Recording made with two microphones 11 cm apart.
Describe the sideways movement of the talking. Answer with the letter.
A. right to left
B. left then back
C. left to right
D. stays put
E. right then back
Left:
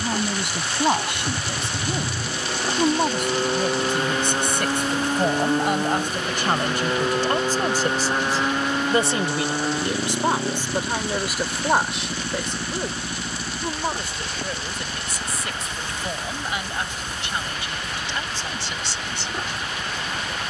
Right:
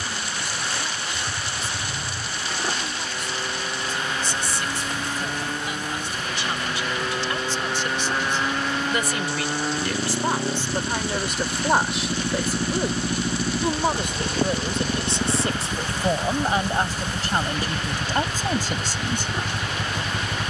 C.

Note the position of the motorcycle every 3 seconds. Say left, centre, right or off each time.
left, left, left, centre, right, right, right.